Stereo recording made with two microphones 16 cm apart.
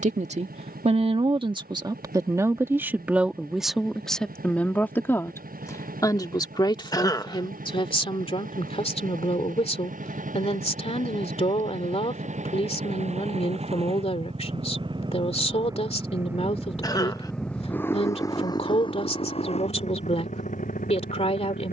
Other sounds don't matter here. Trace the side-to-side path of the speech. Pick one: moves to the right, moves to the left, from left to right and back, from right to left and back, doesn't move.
moves to the left.